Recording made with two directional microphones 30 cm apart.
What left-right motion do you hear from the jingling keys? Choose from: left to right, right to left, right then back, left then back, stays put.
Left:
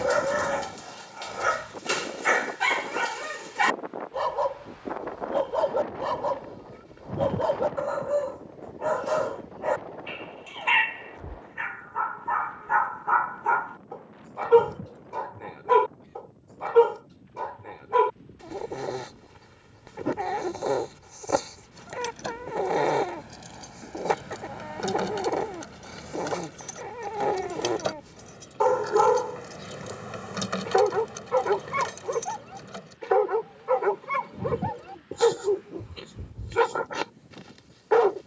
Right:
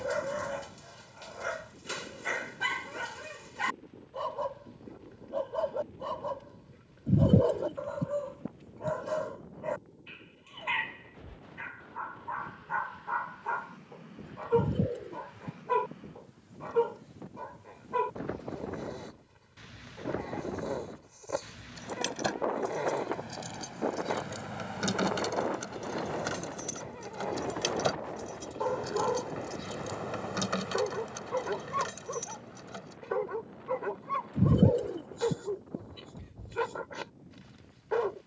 right to left.